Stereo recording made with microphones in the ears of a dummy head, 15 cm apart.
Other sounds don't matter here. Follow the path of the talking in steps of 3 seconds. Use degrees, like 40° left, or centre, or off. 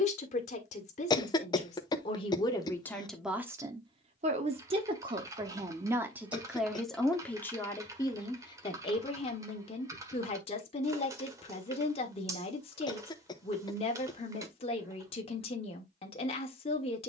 30° left, 20° right, 10° left, 30° left, 30° left, 30° left.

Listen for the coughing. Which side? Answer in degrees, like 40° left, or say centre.
30° left.